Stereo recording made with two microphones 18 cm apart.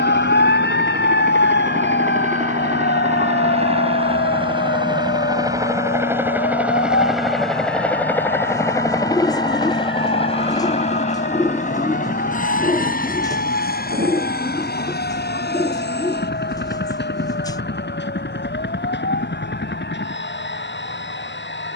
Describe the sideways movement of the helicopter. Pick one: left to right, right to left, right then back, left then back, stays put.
right to left.